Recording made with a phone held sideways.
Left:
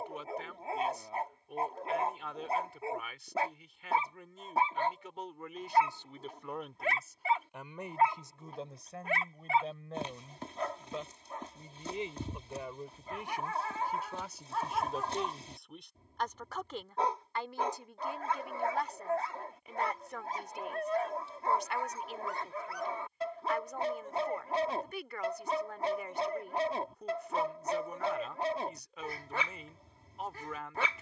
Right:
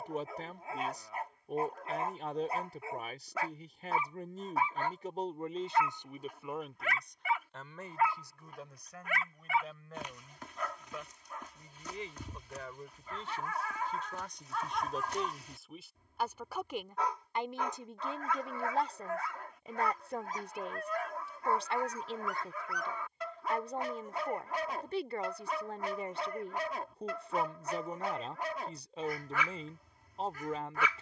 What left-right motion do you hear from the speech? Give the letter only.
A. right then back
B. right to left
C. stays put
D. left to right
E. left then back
E.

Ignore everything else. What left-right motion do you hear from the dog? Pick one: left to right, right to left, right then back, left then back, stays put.
stays put.